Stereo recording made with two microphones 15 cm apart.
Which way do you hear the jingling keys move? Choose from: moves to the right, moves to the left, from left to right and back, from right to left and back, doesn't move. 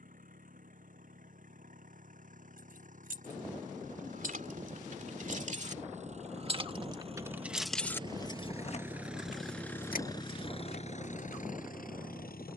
moves to the left.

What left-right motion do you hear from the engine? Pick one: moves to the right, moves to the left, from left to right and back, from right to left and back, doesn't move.
moves to the left.